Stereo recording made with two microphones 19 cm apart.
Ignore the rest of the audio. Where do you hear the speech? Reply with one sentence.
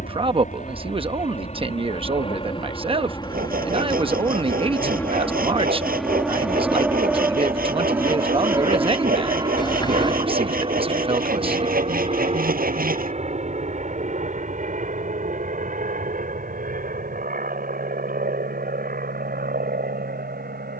You can hear the speech on the right.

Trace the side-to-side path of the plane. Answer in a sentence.
You can hear the plane move from left to right.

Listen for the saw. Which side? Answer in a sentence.
You can hear the saw on the right.